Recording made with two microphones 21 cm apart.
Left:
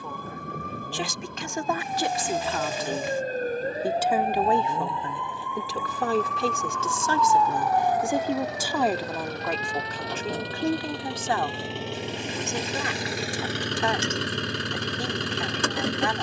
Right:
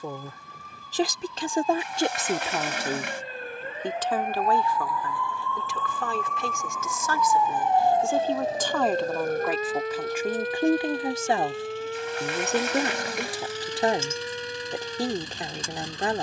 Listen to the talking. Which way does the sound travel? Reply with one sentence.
You can hear the talking go left and come back.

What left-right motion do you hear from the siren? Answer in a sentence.
You can hear the siren move to the right.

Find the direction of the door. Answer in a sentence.
In this clip you hear the door on the right.